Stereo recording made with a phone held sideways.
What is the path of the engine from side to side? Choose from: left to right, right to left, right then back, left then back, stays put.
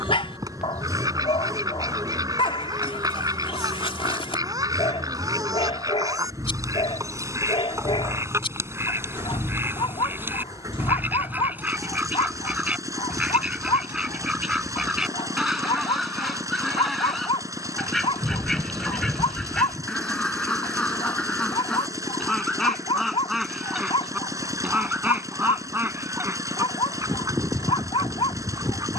stays put.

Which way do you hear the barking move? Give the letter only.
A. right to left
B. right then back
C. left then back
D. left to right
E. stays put
E.